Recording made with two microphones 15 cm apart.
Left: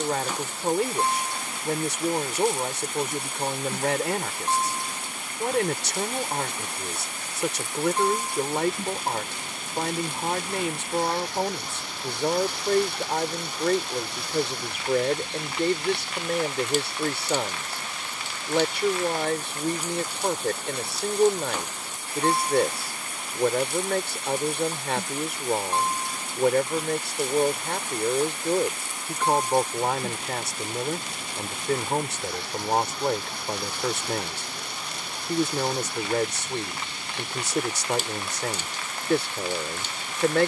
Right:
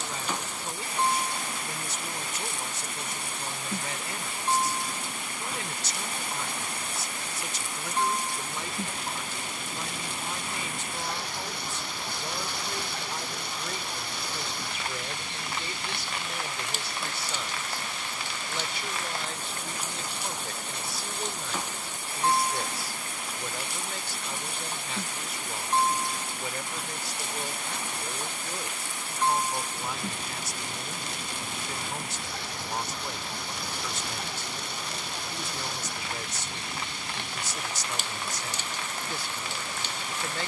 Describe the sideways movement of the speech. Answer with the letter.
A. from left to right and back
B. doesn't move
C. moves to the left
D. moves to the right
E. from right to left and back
B.